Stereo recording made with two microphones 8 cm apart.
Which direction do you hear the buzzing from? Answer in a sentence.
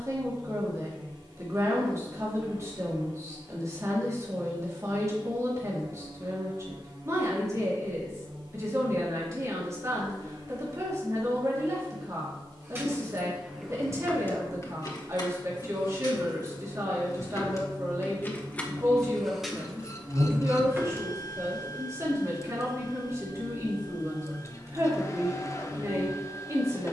You can hear the buzzing on the right.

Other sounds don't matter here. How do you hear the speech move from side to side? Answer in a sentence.
You can hear the speech stay in one place.